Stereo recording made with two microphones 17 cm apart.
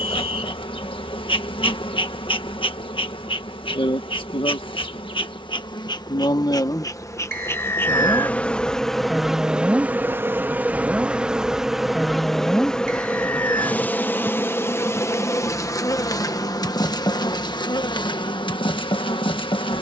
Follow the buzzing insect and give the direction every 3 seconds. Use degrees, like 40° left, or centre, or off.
30° left, 30° left, 20° left, 10° right, 10° left, 20° left, 30° left.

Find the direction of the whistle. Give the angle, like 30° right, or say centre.
70° right.